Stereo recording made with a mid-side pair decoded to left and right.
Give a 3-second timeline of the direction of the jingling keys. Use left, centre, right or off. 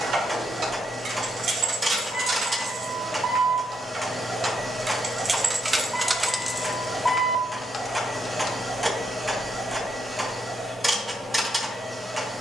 right, right, centre, off.